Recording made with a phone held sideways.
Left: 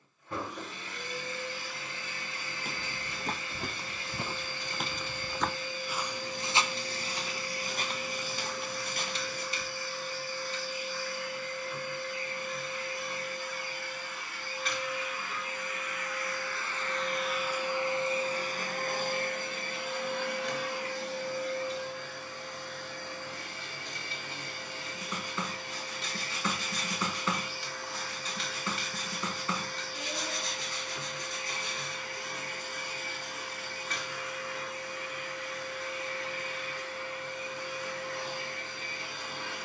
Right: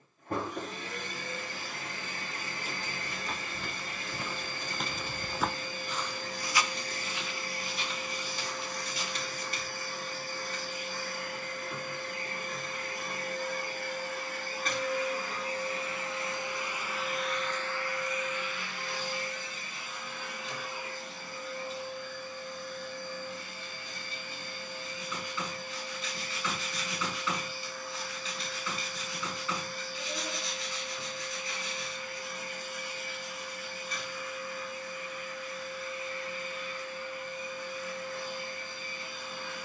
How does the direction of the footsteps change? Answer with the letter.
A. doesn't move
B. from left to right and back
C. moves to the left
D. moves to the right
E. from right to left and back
B.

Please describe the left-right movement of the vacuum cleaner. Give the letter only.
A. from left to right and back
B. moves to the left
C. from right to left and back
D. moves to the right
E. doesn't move
B.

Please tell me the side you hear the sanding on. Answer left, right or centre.
left.